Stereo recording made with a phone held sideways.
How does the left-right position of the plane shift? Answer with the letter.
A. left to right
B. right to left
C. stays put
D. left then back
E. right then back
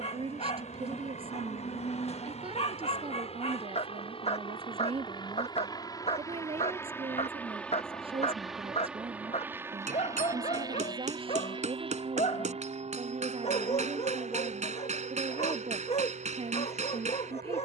A.